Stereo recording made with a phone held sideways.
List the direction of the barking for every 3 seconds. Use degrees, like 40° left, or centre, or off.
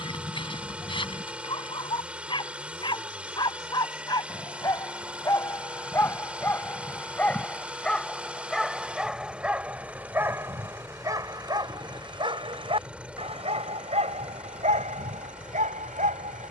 40° left, 30° left, 10° left, 20° right, 50° right, 60° right.